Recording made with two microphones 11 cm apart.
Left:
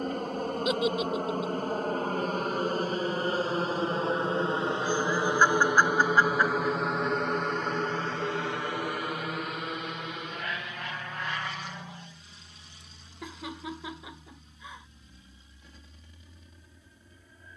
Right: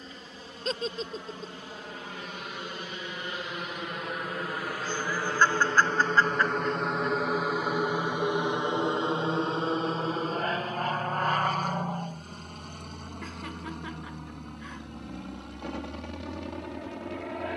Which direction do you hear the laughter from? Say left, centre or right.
centre.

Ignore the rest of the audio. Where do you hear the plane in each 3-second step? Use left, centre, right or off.
left, left, centre, right, right, right.